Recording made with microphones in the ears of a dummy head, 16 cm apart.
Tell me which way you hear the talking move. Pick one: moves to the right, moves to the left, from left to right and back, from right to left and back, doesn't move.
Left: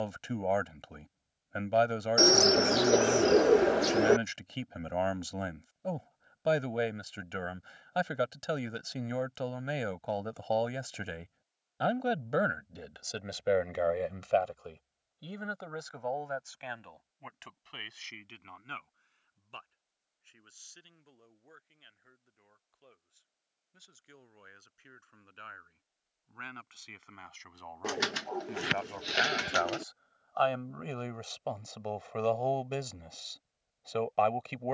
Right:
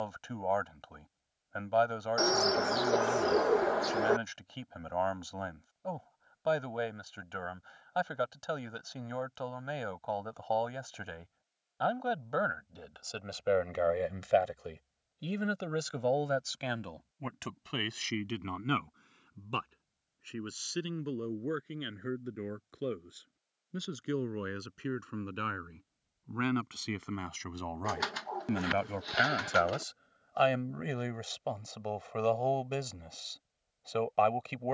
from left to right and back.